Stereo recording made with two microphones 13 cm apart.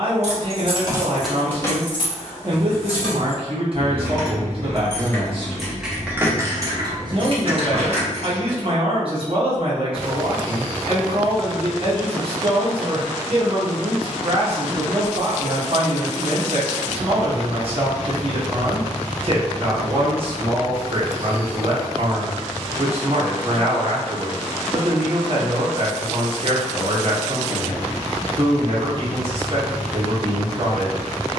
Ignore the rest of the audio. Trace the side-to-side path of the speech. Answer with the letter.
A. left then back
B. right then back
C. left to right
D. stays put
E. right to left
D.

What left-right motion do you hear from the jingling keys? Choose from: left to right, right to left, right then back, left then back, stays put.
left then back.